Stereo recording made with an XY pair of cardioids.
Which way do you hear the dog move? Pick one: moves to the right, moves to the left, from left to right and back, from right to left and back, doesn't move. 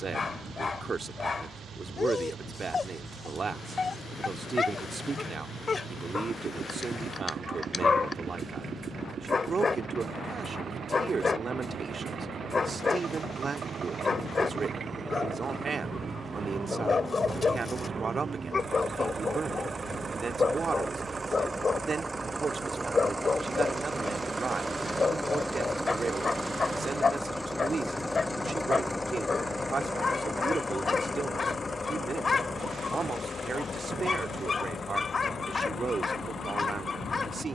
doesn't move.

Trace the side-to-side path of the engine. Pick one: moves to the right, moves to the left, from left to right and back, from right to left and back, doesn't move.
moves to the left.